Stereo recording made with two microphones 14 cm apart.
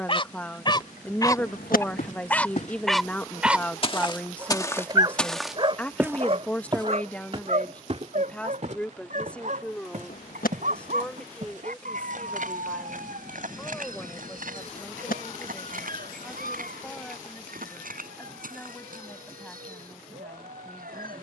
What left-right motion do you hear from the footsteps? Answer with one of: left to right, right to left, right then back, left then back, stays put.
left to right.